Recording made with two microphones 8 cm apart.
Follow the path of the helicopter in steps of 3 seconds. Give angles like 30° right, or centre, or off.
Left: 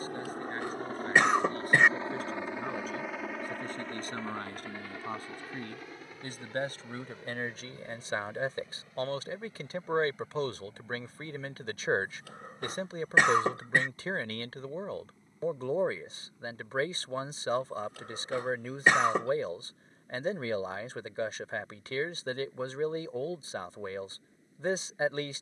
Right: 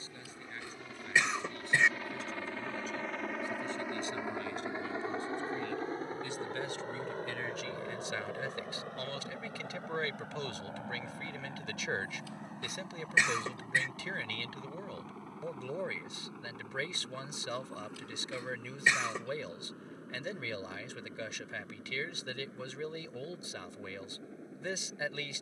30° left, 10° right, 40° right, 50° right, 60° right, 60° right, 70° right, 70° right, 70° right.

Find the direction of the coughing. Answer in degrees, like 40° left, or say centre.
50° left.